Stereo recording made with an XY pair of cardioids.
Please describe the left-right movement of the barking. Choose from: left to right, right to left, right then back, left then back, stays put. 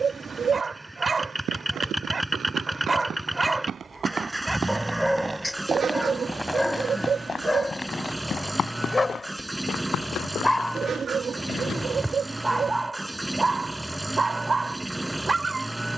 left then back.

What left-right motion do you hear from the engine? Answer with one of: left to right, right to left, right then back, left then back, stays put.
stays put.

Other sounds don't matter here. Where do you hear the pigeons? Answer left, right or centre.
right.